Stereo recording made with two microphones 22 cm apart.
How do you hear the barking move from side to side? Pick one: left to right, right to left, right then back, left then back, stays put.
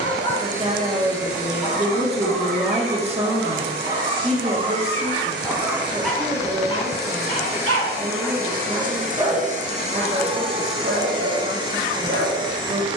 left then back.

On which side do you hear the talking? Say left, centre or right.
right.